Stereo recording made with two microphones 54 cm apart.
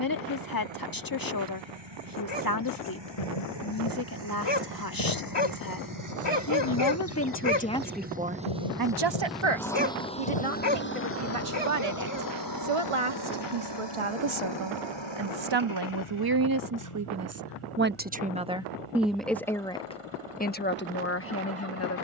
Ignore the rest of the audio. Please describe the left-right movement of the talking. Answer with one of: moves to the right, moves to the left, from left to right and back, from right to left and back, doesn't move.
from left to right and back.